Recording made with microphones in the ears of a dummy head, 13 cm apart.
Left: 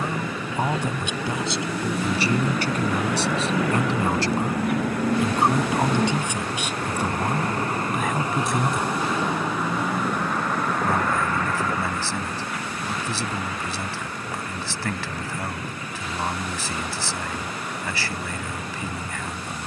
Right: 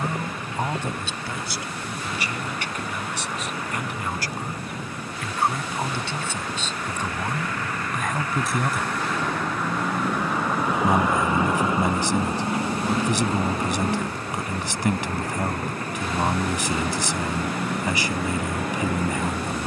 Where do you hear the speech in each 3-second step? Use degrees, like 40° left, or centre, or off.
20° left, 20° left, 10° left, 20° right, 20° right, 20° right, 20° right.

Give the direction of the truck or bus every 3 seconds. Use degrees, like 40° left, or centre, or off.
70° left, 60° left, 30° left, centre, 30° right, 40° right, 50° right.